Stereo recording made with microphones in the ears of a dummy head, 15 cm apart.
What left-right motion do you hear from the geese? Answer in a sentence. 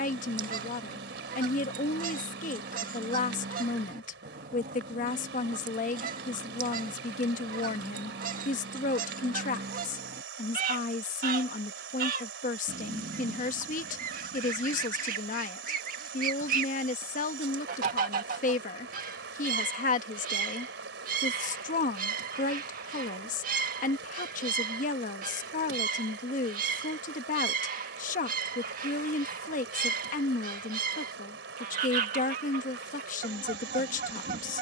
In this clip you hear the geese stay put.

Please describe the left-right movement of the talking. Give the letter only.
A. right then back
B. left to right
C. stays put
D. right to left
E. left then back
C.